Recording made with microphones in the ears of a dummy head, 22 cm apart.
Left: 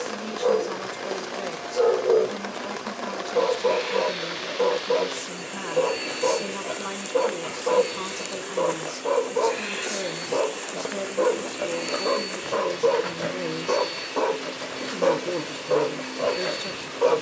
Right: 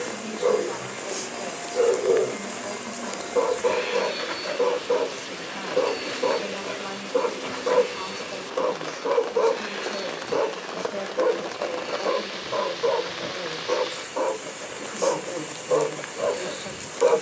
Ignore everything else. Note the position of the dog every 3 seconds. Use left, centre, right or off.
right, right, right, centre, left, centre.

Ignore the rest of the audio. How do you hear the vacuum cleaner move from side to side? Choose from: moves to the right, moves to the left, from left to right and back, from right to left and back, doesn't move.
moves to the left.